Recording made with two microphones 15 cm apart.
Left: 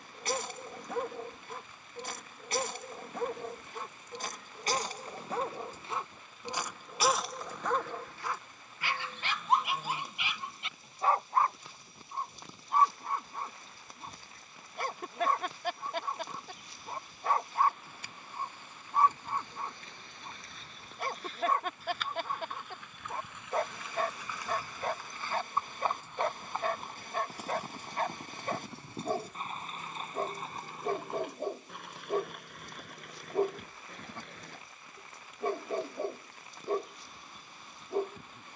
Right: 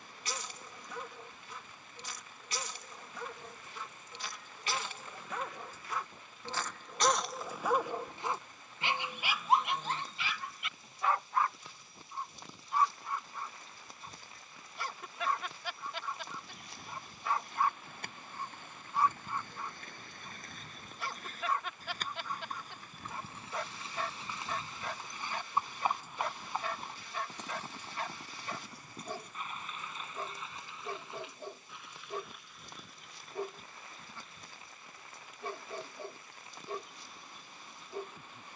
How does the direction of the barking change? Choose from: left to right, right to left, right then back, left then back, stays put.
right then back.